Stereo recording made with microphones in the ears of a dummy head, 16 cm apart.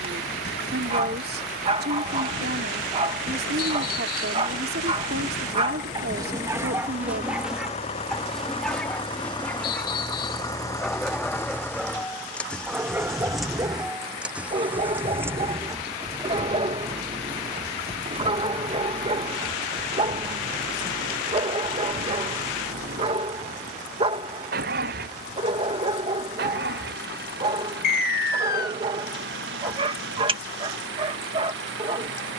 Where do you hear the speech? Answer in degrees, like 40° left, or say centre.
60° right.